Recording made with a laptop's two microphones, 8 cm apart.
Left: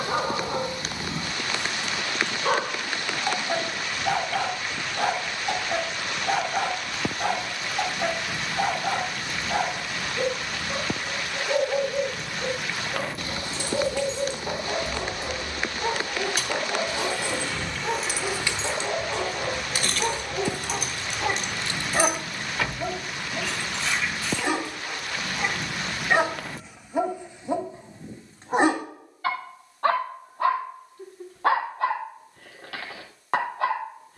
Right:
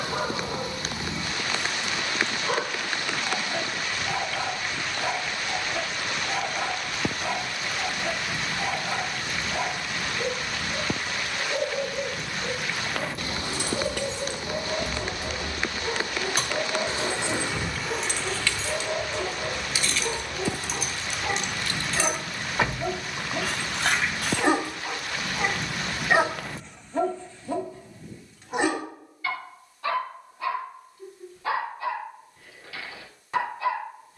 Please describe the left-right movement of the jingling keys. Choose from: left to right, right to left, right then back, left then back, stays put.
left then back.